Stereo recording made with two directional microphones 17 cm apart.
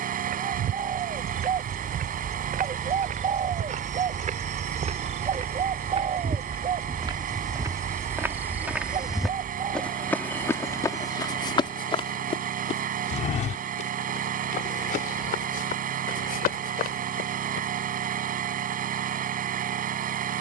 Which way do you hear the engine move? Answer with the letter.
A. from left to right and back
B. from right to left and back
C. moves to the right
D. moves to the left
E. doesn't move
E.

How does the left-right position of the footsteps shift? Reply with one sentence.
You can hear the footsteps travel towards the left.